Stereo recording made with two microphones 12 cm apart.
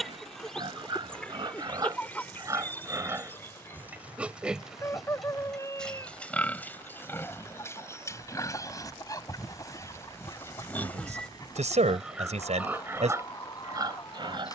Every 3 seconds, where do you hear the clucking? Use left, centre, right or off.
centre, left, left, left, left.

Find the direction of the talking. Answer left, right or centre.
right.